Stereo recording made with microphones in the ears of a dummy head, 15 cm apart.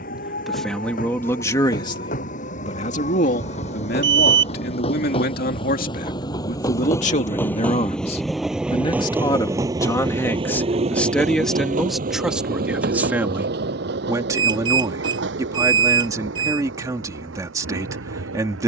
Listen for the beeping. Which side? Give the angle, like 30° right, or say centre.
30° right.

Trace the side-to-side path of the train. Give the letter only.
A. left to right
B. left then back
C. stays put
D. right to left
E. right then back
A.